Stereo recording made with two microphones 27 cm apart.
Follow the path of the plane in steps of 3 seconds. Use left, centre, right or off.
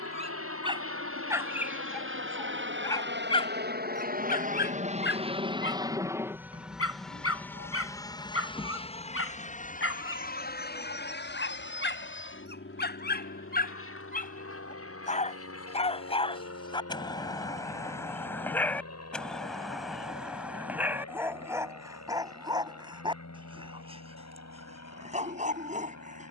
right, right, centre, left, left, left, left, left, left.